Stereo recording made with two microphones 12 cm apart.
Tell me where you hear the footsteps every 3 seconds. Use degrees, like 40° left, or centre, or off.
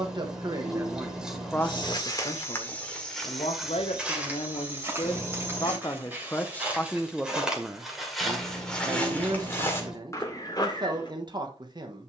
30° left, 10° right, centre, 30° left.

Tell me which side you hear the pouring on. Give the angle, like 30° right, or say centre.
10° right.